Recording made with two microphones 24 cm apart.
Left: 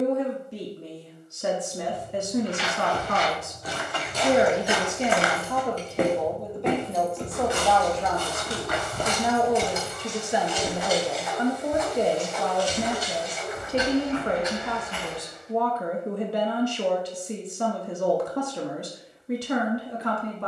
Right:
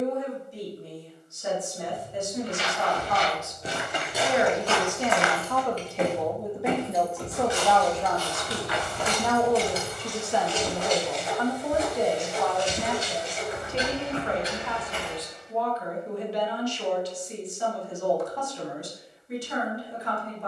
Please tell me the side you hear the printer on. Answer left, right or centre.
right.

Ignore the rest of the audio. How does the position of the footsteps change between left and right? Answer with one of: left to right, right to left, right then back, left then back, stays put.
left then back.